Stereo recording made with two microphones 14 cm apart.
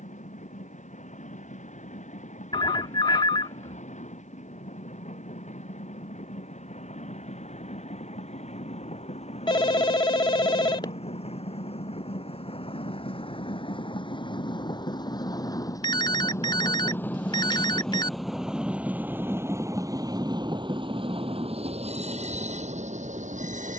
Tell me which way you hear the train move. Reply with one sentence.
In this clip you hear the train move from left to right.